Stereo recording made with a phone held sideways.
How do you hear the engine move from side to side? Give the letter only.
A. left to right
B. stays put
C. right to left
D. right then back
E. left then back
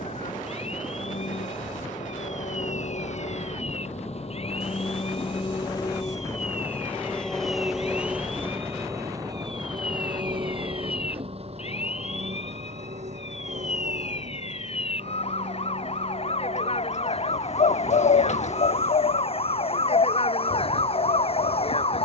A.